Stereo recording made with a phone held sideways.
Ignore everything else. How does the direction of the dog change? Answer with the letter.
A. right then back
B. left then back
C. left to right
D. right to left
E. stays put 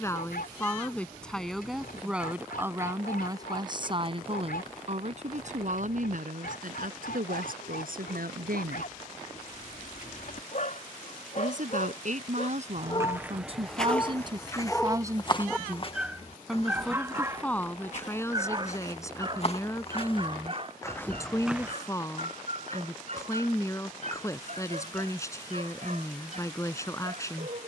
C.